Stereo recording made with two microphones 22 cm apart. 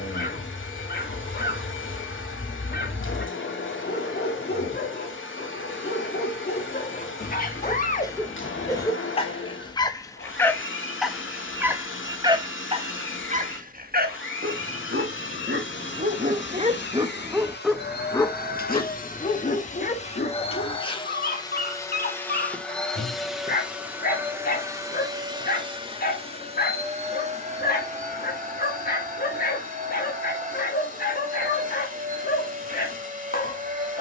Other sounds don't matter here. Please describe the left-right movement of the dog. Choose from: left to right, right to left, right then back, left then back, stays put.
right then back.